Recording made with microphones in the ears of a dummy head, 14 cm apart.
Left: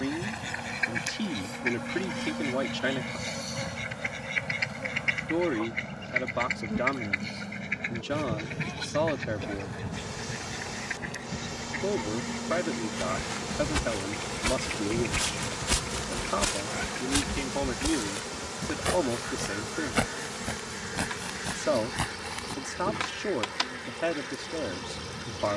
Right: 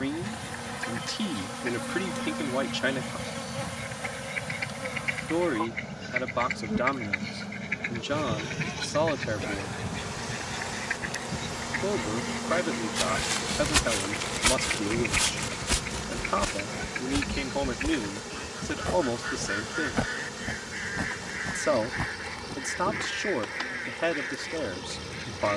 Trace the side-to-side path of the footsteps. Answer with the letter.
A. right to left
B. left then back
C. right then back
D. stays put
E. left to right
A.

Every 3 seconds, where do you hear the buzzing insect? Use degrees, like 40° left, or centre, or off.
70° right, 70° right, 70° right, 50° right, 20° right, 30° left, 50° left, 60° left, 60° left.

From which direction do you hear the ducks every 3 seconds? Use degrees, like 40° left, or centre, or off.
50° left, 30° left, centre, 20° right, 30° right, 40° right, 40° right, 50° right, 50° right.